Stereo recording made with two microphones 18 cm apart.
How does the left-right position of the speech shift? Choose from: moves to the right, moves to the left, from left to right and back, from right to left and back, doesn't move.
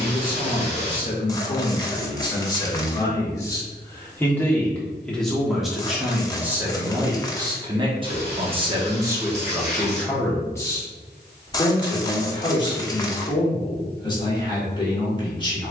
from left to right and back.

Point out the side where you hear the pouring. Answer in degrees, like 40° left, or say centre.
80° right.